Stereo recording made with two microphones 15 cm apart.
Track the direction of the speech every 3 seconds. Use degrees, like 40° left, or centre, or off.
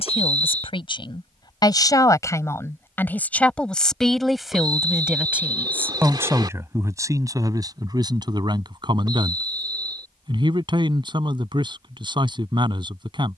30° left, centre, 20° right, 30° right, 30° right.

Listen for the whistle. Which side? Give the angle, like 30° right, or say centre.
30° right.